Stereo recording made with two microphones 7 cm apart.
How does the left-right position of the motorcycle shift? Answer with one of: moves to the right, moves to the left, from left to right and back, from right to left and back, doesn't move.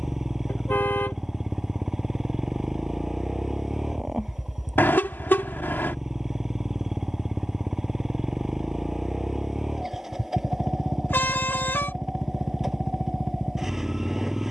doesn't move.